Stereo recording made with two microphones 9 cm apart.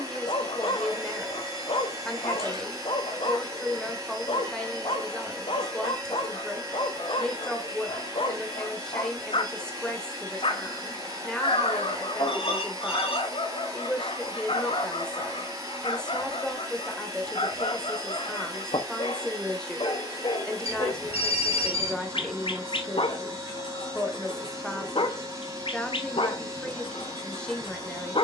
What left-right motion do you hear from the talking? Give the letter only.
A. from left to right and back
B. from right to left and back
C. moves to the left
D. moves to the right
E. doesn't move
E.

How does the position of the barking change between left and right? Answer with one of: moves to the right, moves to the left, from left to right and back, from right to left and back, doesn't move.
doesn't move.